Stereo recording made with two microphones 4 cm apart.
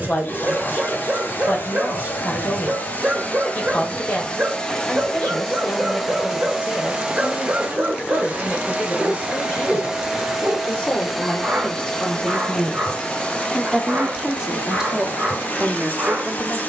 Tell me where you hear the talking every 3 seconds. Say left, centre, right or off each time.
left, left, left, left, centre, right.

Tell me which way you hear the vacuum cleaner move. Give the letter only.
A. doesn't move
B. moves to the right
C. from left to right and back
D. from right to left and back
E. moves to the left
C.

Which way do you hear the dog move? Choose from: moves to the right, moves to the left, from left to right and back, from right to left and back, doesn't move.
doesn't move.